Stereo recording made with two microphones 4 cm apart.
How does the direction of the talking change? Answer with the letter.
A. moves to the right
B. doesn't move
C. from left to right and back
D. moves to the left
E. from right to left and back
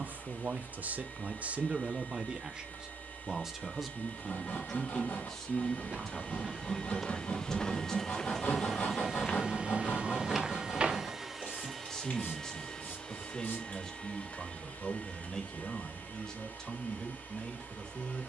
D.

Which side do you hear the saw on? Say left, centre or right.
left.